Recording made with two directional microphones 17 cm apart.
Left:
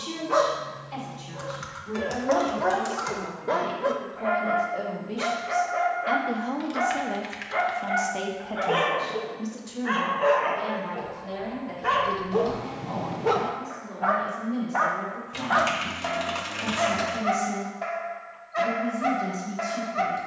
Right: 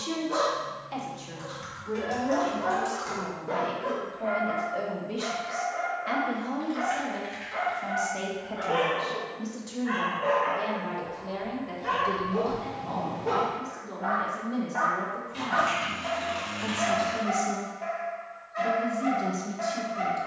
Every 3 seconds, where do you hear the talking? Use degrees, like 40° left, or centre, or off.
20° right, centre, 20° left, centre, 20° right, 20° right, 20° right.